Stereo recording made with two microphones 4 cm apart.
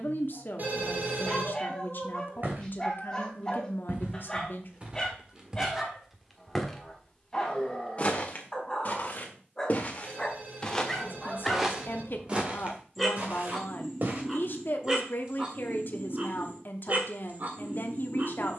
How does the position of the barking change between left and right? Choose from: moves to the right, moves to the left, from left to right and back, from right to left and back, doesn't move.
moves to the right.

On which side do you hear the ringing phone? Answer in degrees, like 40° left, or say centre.
50° right.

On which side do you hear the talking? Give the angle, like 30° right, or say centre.
60° left.